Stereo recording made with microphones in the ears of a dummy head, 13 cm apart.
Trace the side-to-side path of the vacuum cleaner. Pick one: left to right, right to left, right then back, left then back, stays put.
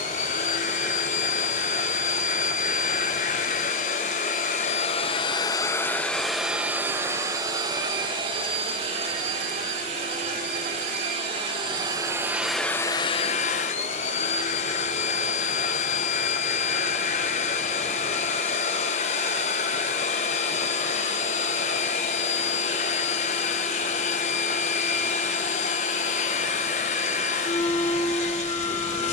right then back.